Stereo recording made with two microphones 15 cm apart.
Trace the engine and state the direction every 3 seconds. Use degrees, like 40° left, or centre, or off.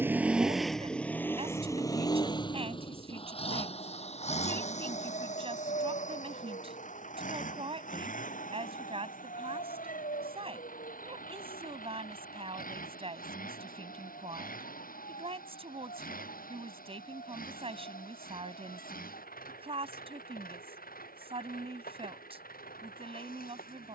10° left, 50° left, 60° left, 60° left, 70° left, 70° left, 70° left, 70° left.